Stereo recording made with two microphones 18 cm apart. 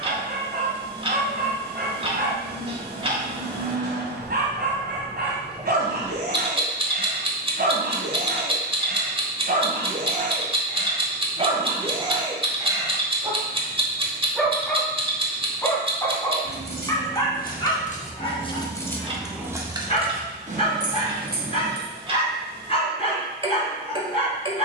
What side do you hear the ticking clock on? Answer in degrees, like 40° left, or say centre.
30° right.